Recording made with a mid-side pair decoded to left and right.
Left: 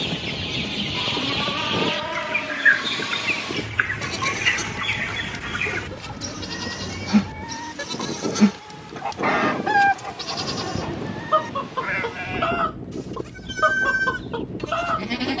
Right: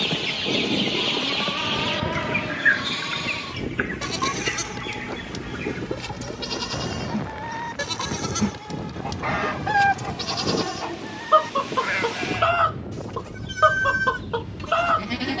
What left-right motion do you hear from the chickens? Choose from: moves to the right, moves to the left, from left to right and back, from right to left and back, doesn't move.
from right to left and back.